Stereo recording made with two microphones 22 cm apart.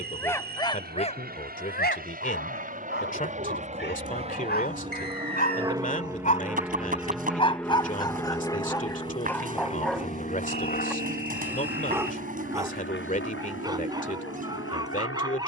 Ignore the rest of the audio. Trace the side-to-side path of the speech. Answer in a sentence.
In this clip you hear the speech stay put.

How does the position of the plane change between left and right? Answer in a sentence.
You can hear the plane move from right to left.